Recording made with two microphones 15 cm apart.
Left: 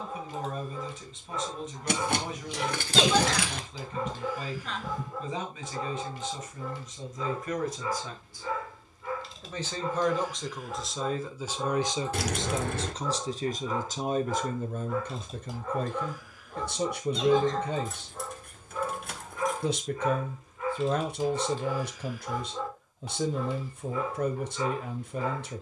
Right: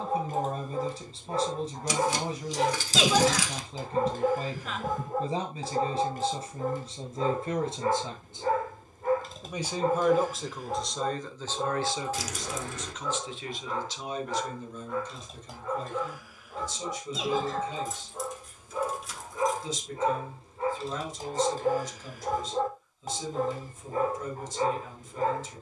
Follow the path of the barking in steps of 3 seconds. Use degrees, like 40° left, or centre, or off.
50° right, 50° right, 50° right, 40° right, centre, centre, 20° right, 40° right, 40° right.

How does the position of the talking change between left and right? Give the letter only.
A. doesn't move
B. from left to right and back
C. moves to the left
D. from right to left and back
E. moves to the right
C.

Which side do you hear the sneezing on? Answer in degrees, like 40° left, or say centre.
centre.